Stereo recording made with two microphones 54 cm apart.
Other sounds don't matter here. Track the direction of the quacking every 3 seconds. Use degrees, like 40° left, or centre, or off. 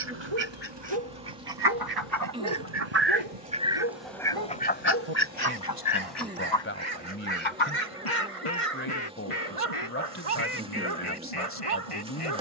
50° right, 10° left, 60° left, 80° left.